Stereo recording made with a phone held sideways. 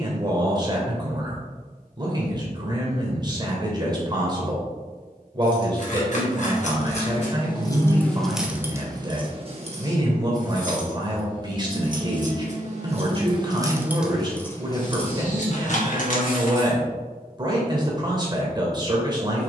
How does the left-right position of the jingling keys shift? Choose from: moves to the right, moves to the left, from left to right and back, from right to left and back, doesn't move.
from left to right and back.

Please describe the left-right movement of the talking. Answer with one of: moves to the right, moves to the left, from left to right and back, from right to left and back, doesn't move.
doesn't move.